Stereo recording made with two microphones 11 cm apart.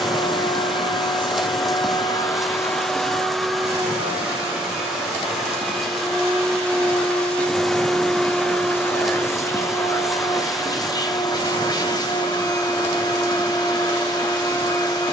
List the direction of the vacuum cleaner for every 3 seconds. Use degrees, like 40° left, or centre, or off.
40° left, centre, 10° left, 30° left, 40° left.